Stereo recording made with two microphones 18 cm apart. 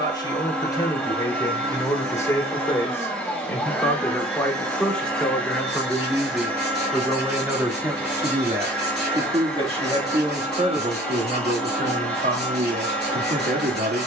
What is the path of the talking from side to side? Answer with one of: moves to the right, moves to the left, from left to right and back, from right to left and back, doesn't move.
moves to the right.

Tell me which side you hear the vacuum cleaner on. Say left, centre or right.
centre.